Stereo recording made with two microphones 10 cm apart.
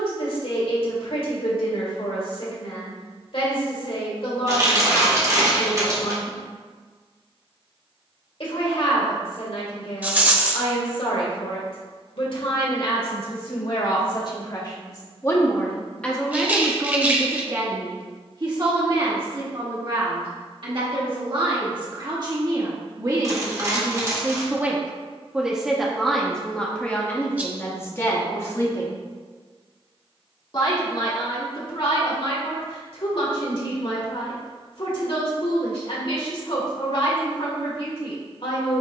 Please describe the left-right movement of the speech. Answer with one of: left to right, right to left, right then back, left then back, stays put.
right then back.